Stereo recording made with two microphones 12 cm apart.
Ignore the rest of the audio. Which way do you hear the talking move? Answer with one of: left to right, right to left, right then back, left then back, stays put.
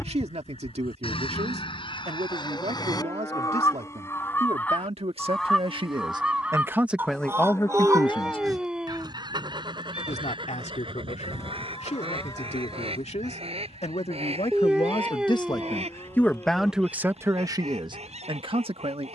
left then back.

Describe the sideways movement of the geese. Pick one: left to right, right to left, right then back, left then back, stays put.
left to right.